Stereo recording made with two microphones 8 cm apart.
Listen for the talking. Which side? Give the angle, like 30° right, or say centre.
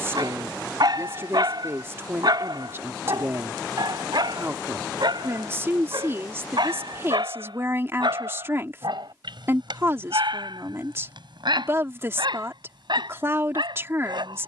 30° right.